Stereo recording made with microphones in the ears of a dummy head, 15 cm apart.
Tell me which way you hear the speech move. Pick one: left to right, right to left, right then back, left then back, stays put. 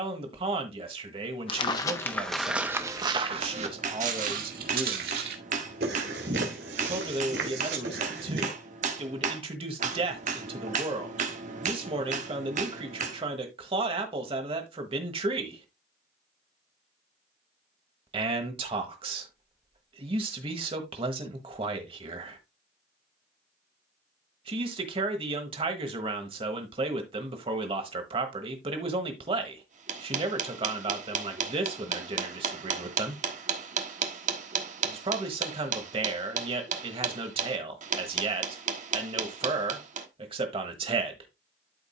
stays put.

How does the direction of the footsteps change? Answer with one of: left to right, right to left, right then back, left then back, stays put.
left to right.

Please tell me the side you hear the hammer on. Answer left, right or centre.
right.